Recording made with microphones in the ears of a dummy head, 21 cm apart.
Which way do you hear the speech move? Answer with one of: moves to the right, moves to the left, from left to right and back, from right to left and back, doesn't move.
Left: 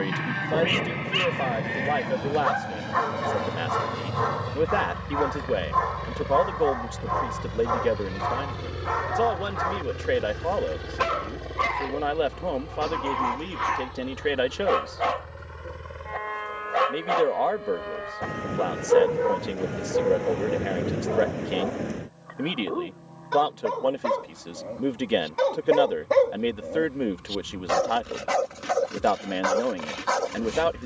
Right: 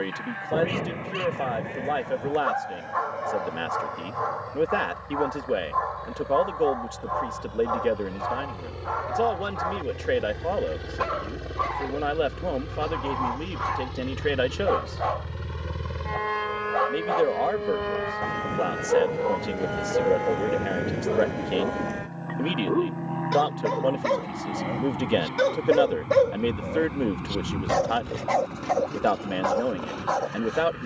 doesn't move.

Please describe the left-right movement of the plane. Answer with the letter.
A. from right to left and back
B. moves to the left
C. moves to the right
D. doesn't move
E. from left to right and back
C.